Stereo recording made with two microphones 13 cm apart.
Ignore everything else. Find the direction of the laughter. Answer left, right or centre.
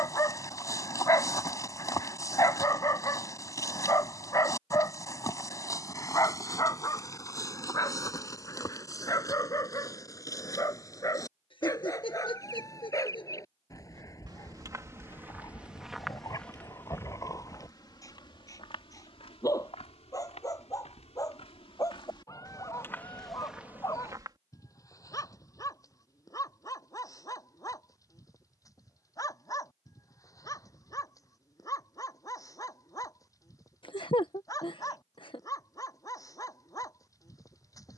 left.